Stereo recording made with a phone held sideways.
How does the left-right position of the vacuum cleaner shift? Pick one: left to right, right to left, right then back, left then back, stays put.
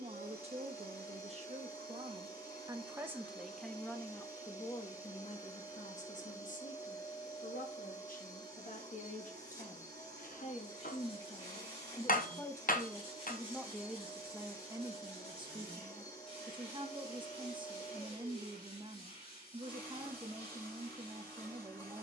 stays put.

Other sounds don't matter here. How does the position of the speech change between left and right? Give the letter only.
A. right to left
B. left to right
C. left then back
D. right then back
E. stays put
C.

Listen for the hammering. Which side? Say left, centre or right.
left.